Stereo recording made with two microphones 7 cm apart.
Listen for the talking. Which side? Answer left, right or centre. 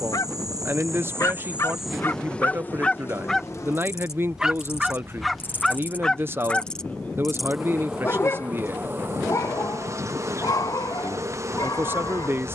right.